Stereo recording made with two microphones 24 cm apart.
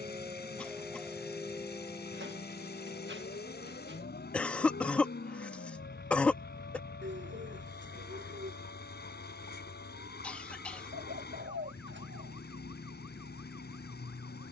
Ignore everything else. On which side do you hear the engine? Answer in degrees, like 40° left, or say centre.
40° left.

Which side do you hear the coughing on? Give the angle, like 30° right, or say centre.
centre.